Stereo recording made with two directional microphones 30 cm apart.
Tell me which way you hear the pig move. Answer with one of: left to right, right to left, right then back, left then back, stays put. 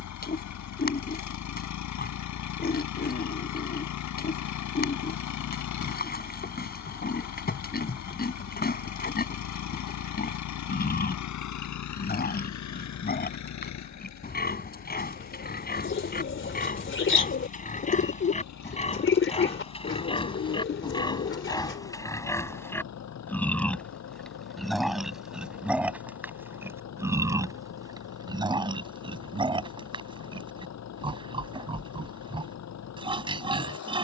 left to right.